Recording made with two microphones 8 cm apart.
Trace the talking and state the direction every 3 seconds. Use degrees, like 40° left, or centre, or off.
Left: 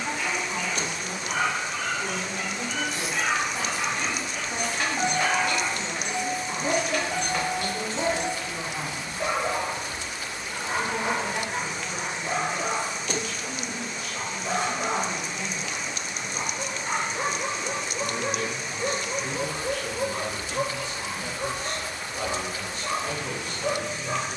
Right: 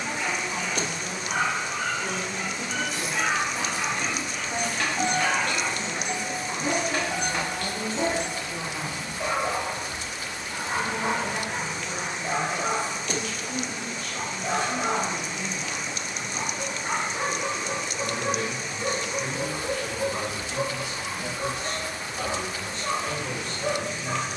20° left, 20° left, 20° left, 20° left, 20° left, 20° left, 20° right, 10° left.